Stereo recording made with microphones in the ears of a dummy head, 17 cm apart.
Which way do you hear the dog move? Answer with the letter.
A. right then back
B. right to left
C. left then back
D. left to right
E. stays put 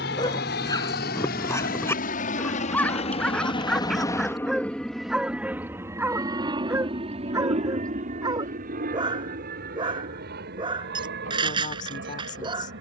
D.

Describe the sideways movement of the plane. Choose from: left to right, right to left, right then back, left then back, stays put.
left to right.